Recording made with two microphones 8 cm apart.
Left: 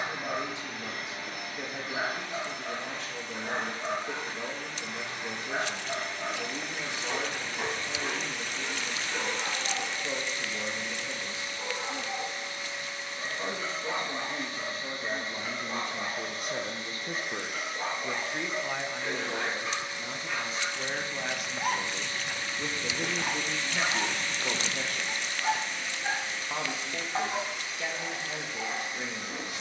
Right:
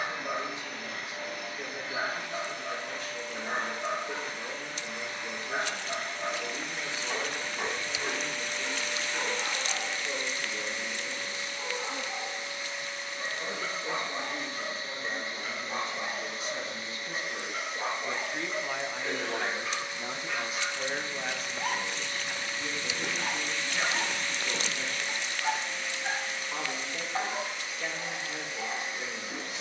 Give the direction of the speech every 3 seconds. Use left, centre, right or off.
left, left, left, left, left, left, centre, left, left, left.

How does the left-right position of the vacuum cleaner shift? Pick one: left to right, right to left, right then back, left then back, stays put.
stays put.